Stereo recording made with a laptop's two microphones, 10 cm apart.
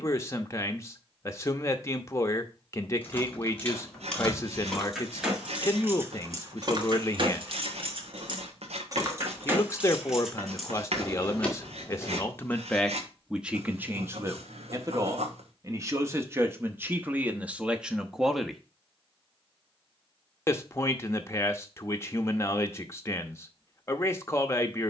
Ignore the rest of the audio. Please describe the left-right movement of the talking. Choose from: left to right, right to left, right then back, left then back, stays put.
right then back.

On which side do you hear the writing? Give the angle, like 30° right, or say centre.
80° right.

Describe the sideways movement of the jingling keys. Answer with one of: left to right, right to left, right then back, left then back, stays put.
right then back.